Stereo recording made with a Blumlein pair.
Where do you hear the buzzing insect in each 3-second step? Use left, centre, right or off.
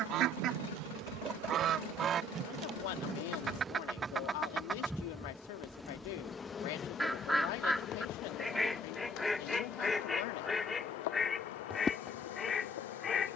right, centre, left, left, left.